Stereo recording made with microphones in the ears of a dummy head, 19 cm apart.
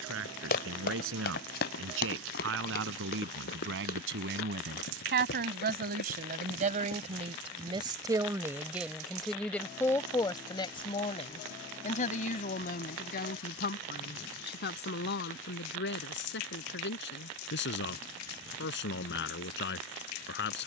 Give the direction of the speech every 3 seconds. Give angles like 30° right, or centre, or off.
70° right, 60° right, 30° right, 20° left, 50° left, 60° left, 60° left.